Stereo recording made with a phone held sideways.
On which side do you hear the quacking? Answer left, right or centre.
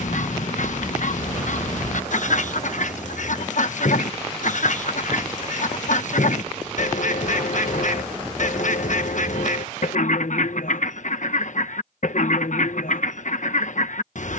left.